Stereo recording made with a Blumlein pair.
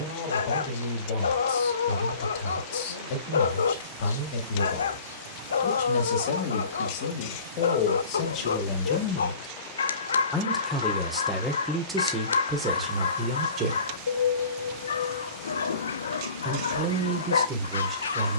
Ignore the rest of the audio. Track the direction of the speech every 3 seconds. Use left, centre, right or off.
left, left, left, centre, right, right.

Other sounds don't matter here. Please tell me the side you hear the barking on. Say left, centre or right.
left.